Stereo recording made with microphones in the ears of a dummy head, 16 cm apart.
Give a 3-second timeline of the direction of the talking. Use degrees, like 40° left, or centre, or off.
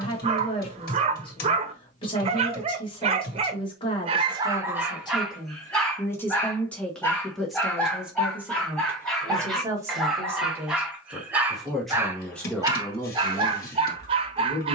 30° left, 30° left, centre, 10° right, 20° left.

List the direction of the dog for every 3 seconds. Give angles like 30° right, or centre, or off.
40° right, 20° right, 10° left, centre, 30° right.